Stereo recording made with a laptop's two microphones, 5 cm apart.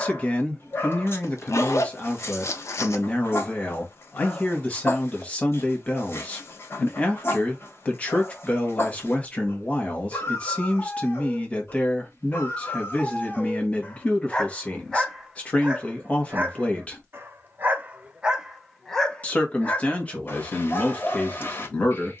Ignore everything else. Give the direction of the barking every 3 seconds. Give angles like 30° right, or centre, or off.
50° left, 50° left, 50° left, 50° left, 30° left, 30° right, 20° left, 40° left.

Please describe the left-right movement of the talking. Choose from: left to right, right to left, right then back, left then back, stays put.
stays put.